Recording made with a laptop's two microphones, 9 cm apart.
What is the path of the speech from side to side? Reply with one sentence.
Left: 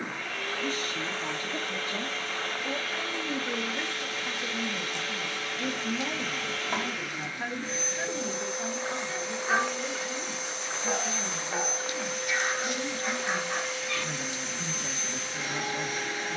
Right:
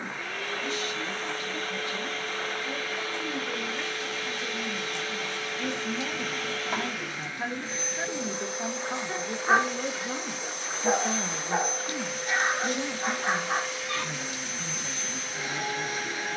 In this clip you hear the speech go right and come back.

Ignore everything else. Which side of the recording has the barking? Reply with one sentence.
In this clip you hear the barking on the right.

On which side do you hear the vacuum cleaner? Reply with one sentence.
You can hear the vacuum cleaner in the centre.